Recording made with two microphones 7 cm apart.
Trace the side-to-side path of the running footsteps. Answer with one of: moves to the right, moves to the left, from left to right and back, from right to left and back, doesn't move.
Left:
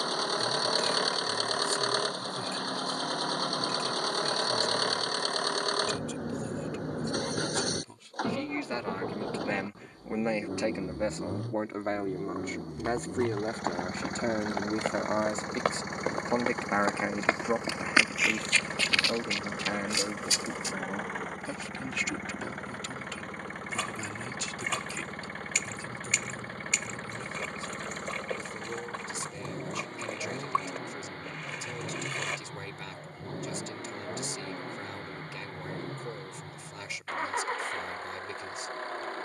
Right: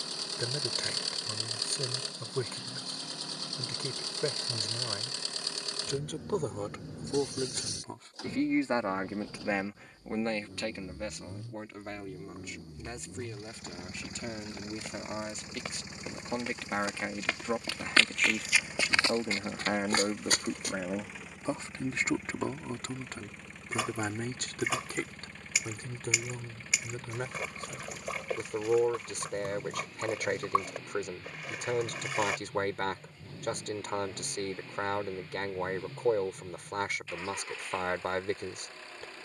moves to the right.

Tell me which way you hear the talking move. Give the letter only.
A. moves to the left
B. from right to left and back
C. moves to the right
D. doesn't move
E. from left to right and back
B.